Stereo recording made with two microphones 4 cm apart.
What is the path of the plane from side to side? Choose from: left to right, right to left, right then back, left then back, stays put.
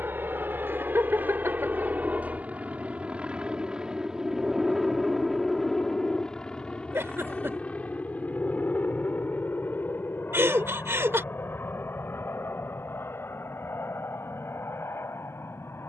right to left.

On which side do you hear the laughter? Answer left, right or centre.
right.